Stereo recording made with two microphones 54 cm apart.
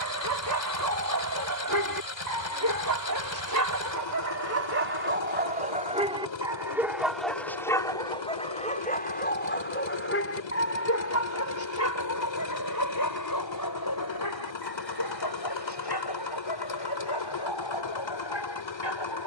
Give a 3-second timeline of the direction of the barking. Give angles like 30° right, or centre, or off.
40° right, 30° right, centre, 30° left, 40° left, 50° left, 50° left.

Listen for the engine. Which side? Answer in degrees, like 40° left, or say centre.
50° left.